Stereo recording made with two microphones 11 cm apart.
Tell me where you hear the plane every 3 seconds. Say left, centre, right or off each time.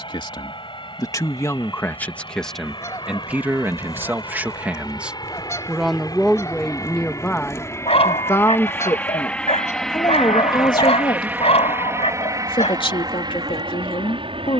left, left, left, centre, right.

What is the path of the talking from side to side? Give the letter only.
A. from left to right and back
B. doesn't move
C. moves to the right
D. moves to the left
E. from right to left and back
A.